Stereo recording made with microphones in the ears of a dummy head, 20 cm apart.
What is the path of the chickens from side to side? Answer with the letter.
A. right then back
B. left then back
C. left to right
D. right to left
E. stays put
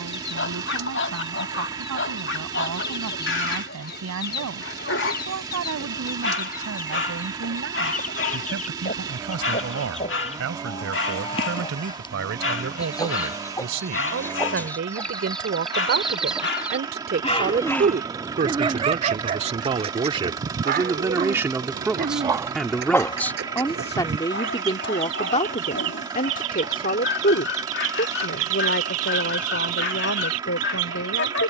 C.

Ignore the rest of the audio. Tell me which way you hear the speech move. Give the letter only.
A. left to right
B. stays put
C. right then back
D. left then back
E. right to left
E.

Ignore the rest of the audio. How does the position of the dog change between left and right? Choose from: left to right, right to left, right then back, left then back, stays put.
right then back.